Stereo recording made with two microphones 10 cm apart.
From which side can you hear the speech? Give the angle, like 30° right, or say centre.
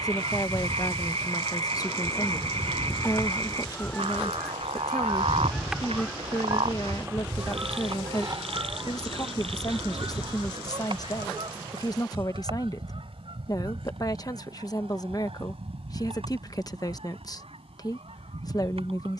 40° left.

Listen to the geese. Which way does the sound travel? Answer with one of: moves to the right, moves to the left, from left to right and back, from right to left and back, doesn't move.
moves to the right.